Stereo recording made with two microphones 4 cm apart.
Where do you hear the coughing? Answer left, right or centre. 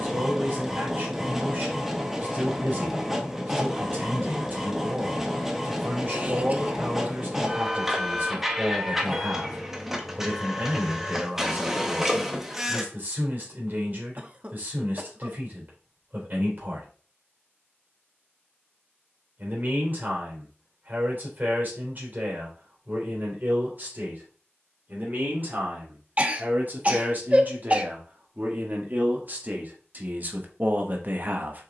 right.